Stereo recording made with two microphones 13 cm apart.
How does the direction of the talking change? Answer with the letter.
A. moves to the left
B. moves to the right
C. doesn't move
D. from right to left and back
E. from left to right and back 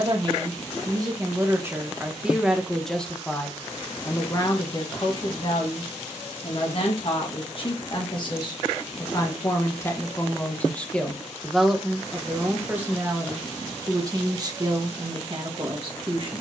D.